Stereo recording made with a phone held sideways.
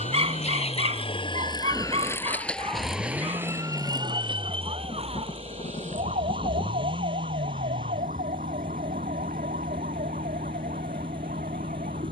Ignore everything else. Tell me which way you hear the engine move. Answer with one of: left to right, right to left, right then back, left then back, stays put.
stays put.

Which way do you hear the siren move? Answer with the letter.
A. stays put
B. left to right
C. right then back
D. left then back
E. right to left
B.